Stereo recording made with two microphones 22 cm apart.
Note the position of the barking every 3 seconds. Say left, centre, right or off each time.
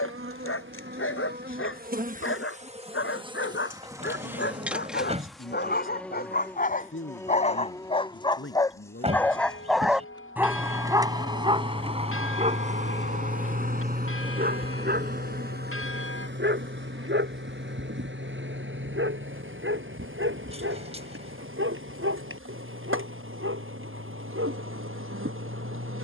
left, left, left, centre, right, right, right, right, right.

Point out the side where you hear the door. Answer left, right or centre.
right.